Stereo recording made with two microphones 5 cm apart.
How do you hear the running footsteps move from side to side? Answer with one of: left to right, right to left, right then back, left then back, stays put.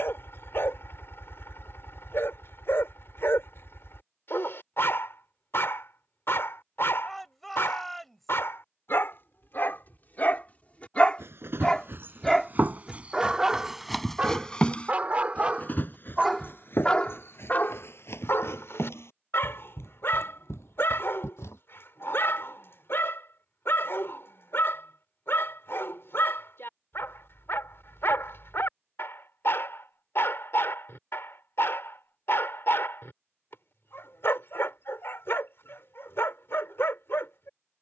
right to left.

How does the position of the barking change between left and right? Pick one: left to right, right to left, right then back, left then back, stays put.
right then back.